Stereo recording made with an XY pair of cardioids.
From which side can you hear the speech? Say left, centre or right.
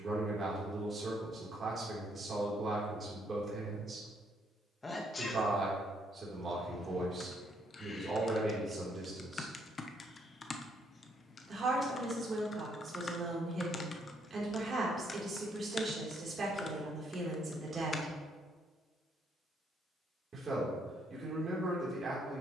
right.